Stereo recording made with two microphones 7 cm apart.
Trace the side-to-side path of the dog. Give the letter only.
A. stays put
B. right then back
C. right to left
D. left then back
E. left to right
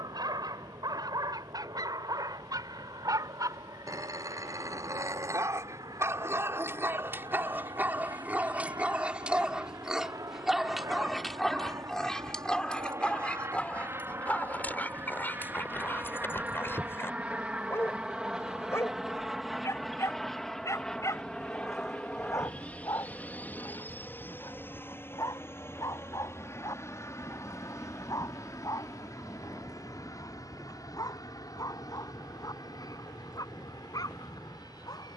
C.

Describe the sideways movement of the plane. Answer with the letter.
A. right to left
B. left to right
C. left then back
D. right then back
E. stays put
A.